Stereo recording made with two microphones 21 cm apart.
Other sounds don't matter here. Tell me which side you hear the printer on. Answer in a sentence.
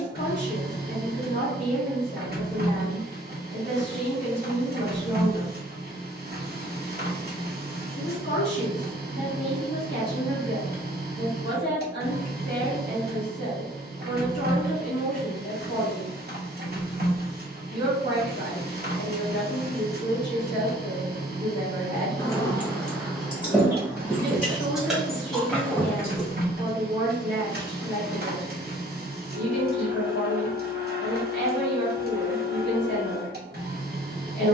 You can hear the printer on the right.